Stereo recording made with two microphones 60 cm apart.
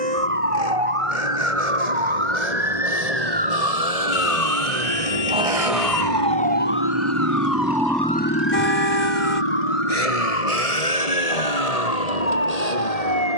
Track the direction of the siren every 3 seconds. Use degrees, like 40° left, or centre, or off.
60° right, 20° right, 30° left, 60° left, 70° left.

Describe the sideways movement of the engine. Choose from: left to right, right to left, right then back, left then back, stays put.
right to left.